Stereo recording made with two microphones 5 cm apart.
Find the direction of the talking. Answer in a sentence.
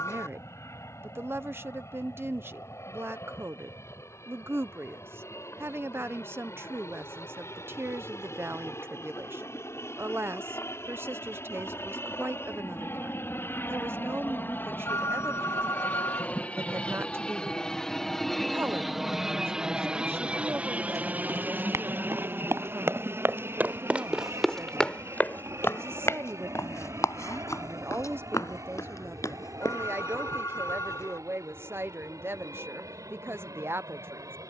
In this clip you hear the talking on the right.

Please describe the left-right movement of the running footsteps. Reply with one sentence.
You can hear the running footsteps move to the left.